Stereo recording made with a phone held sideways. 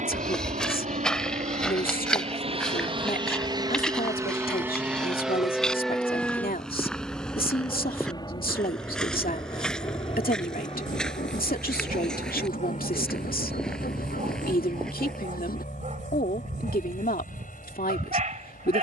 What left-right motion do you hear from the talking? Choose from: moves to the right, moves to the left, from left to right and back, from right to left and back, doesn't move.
doesn't move.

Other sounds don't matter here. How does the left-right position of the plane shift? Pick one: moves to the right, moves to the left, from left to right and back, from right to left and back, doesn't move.
moves to the left.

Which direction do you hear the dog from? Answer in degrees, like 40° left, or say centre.
50° right.